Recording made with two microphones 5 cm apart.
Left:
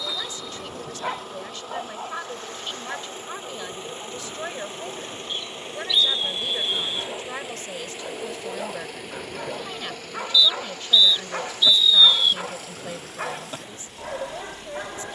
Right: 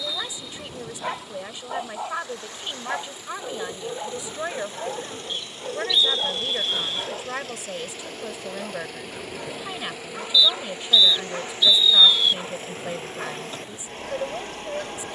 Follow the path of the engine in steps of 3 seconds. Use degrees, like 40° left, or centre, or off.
50° left, 30° left, 20° left, 10° right, 40° right.